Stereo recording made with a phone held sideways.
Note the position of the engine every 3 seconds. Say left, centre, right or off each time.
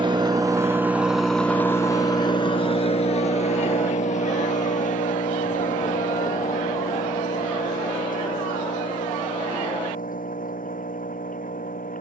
centre, left, left, left.